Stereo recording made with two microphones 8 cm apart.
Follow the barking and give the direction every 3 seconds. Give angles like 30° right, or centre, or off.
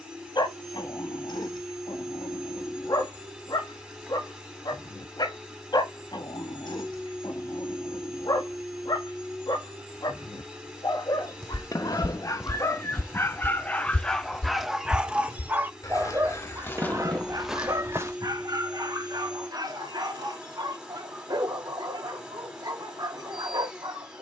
60° left, 60° left, 60° left, 60° left, 20° left, 30° right, 60° right, 60° right.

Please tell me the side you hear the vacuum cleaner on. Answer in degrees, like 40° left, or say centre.
10° right.